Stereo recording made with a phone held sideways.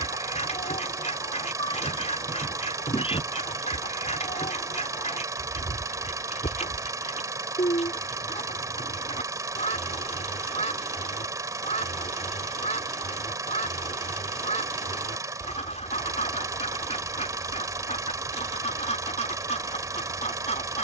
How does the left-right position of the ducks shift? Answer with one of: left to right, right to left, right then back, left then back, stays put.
stays put.